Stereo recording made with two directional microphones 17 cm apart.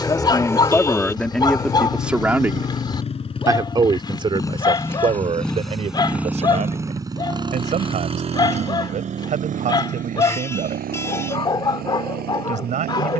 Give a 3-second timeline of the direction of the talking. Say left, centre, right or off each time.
centre, right, right, right, right.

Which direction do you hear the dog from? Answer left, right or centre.
left.